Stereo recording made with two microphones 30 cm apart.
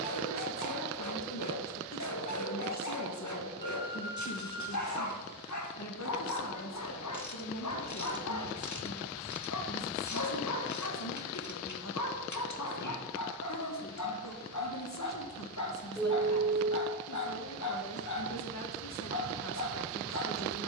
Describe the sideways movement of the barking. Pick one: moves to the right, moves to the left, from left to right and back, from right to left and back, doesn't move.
doesn't move.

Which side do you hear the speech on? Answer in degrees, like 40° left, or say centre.
60° left.